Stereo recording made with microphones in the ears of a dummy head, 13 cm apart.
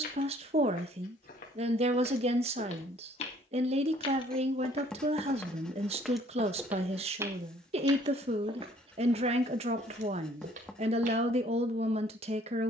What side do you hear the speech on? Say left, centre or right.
right.